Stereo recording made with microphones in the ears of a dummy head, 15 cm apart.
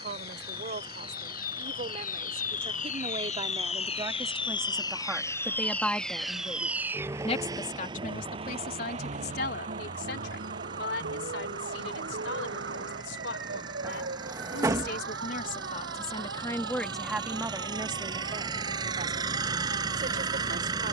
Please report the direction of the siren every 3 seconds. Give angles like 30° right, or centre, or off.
50° left, 30° left, 20° right, 50° right, 70° right, 70° right, 80° right.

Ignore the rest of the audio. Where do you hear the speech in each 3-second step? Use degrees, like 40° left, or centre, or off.
40° right, 20° right, 40° left, 70° left, 70° left, 20° left, 50° right.